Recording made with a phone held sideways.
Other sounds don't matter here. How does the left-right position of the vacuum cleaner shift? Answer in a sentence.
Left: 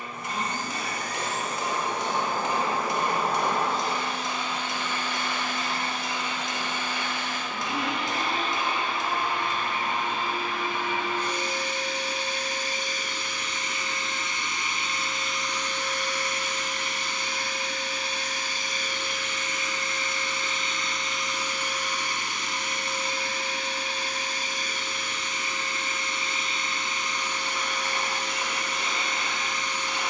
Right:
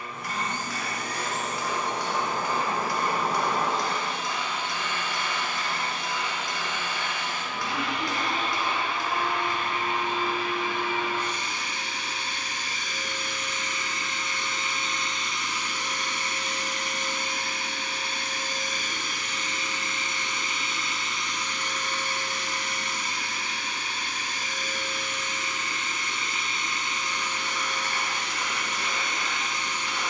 In this clip you hear the vacuum cleaner go right and come back.